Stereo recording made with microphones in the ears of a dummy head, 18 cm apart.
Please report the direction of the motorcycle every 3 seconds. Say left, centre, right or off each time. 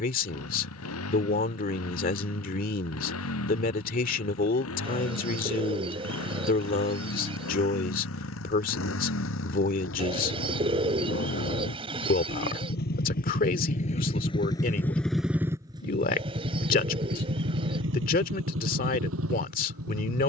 left, left, left, left, left, right, right.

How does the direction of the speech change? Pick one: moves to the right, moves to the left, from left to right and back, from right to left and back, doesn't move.
doesn't move.